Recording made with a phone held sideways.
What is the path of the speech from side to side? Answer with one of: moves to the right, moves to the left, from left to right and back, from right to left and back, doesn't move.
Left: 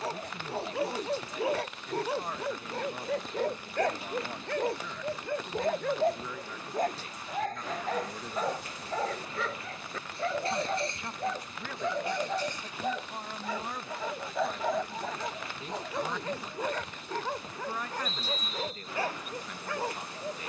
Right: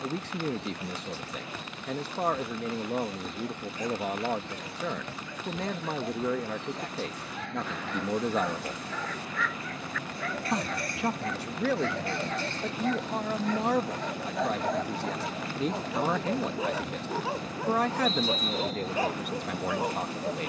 doesn't move.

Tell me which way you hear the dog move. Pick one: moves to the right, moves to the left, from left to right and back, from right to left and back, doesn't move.
moves to the right.